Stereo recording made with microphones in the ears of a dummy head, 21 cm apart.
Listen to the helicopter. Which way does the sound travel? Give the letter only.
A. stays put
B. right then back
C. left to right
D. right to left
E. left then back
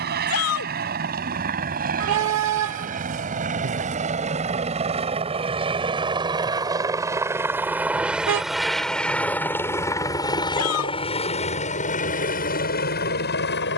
D.